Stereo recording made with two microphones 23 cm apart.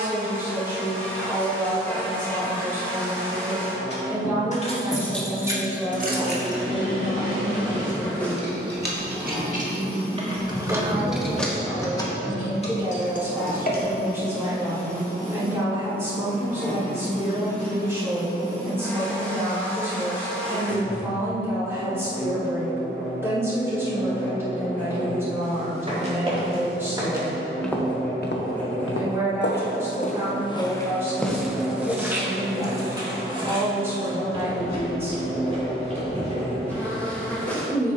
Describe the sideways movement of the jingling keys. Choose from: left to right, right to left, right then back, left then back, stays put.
right then back.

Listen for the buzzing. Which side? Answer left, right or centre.
centre.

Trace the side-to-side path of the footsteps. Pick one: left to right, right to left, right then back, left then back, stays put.
left then back.